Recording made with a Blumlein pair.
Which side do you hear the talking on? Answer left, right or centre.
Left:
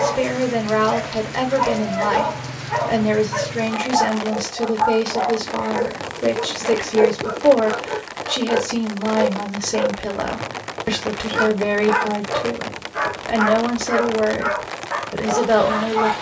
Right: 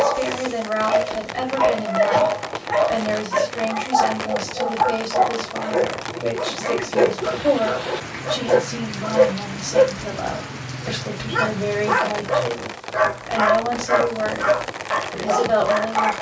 left.